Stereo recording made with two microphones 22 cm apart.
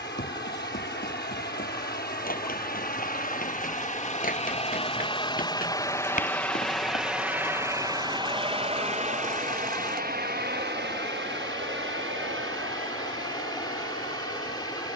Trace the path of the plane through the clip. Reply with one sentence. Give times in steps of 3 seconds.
In this clip you hear the plane on the left from 0 s, in the centre from 6 s and on the right from 9 s.